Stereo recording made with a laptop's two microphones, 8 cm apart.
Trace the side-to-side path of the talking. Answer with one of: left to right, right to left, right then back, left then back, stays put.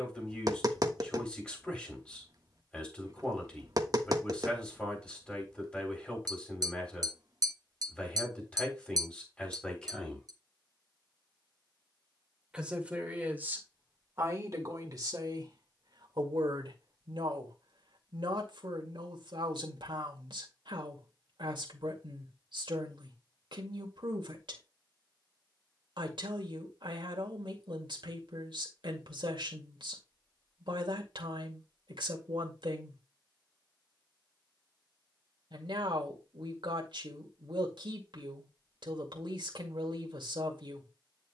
left to right.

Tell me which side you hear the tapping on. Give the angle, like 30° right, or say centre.
50° right.